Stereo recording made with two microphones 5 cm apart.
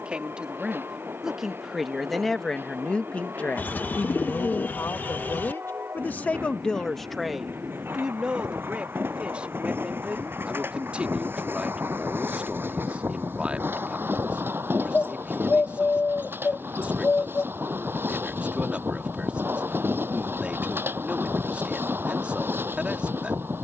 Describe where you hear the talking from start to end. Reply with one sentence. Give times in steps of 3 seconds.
In this clip you hear the talking in the centre from 0 s, on the left from 3 s, in the centre from 6 s and on the right from 9 s.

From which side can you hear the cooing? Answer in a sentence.
In this clip you hear the cooing on the left.